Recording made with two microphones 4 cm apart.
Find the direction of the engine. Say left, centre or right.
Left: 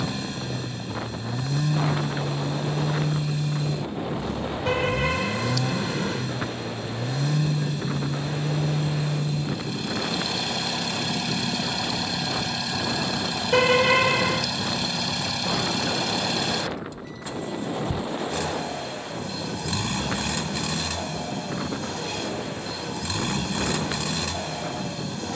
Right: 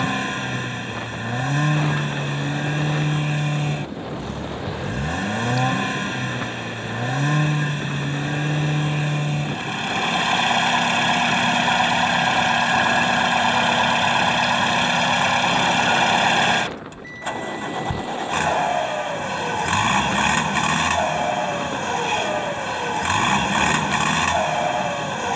right.